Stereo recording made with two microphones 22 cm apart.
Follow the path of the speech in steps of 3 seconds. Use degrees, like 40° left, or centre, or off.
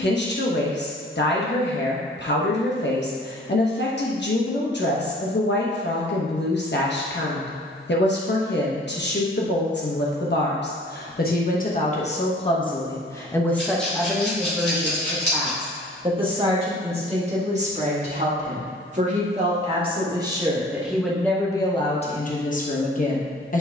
50° left, 50° left, 50° left, 50° left, 10° left, 20° right, 20° right, 30° left.